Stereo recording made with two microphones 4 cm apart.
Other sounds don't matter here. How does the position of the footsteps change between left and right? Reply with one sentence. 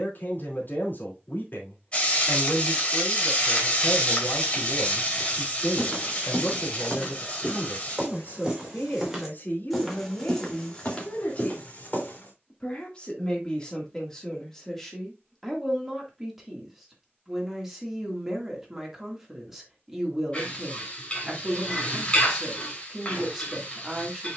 You can hear the footsteps go right and come back.